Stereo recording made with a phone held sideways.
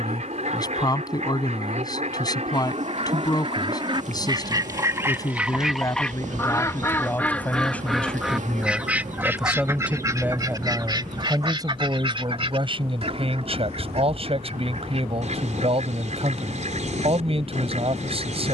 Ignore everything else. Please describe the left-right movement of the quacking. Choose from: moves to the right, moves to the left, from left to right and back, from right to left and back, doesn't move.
from right to left and back.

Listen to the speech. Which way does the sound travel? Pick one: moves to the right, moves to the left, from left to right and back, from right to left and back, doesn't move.
moves to the right.